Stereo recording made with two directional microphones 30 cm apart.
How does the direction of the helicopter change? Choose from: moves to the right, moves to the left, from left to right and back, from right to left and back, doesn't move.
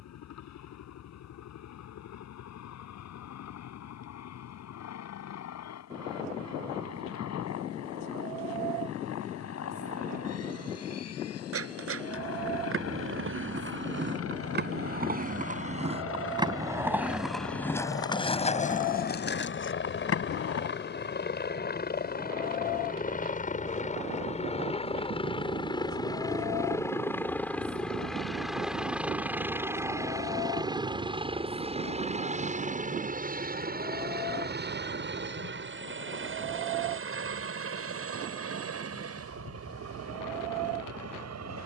moves to the right.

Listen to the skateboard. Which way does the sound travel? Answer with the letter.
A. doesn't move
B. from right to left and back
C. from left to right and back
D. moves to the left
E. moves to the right
D.